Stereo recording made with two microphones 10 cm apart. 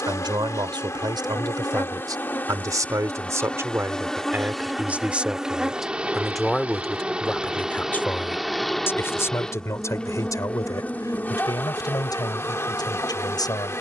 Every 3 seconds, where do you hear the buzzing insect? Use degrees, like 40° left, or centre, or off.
30° left, centre, 10° right, 10° left, 30° left.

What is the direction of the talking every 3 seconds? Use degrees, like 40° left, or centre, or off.
50° right, 20° right, 10° left, 40° left, 50° left.